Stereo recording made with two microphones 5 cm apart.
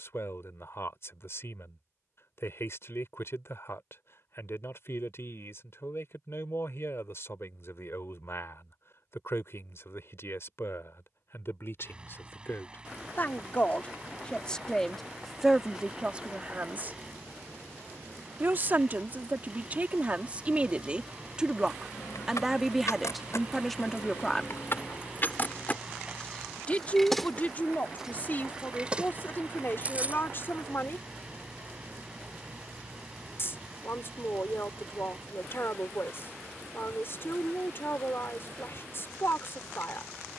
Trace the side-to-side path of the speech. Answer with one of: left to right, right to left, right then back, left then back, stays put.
right then back.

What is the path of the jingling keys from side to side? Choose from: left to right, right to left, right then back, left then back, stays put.
left to right.